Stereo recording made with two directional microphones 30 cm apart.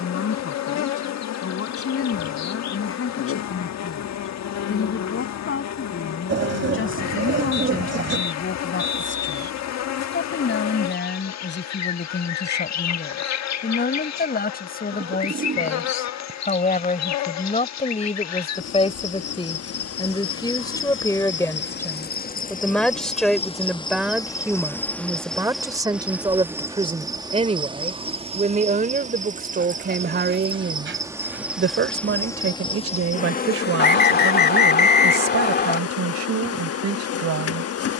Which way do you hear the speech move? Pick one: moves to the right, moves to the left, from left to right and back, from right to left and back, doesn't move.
moves to the right.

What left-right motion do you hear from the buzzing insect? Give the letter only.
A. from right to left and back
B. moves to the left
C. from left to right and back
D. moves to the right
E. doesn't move
C.